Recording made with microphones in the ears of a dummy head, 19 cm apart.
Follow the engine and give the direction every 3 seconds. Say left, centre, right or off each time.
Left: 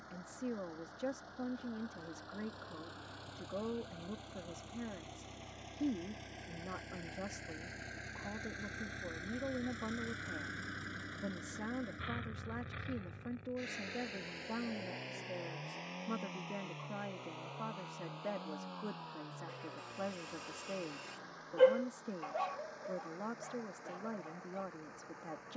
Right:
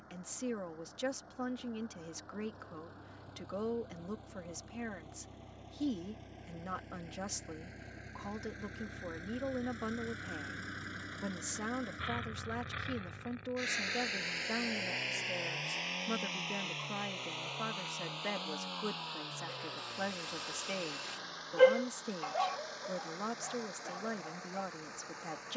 left, left, left, centre, right, right, right, right, right.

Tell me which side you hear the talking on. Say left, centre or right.
right.